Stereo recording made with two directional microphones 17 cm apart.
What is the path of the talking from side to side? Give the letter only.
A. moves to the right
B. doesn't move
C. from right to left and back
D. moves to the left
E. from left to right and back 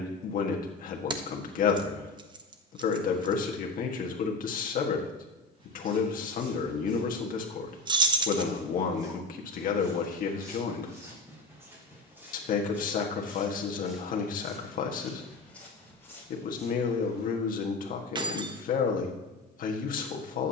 B.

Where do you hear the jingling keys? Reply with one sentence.
In this clip you hear the jingling keys on the right.